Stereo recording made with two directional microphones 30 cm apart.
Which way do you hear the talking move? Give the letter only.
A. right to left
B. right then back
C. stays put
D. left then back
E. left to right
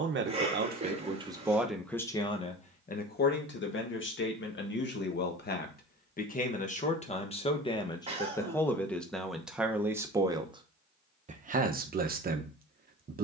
D.